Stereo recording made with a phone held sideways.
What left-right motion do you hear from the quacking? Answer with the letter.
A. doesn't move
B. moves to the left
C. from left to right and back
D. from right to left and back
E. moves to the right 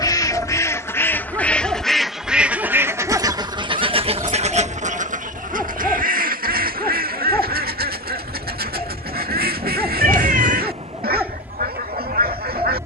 E.